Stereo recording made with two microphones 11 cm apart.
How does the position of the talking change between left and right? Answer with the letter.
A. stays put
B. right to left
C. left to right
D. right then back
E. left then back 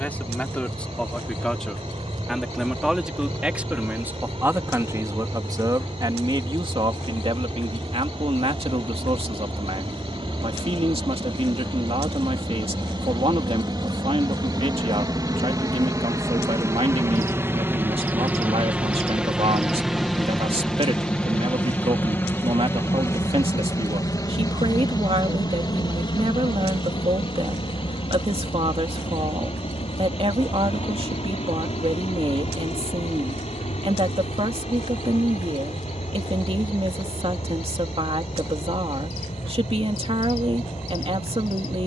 C.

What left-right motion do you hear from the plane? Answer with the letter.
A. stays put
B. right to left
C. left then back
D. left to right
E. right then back
B.